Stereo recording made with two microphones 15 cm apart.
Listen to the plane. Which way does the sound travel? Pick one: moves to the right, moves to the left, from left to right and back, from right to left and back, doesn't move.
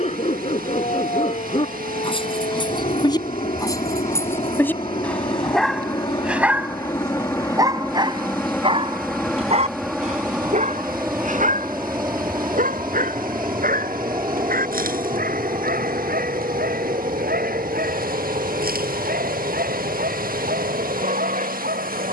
moves to the right.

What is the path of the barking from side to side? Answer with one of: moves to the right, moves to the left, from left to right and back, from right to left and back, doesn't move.
moves to the right.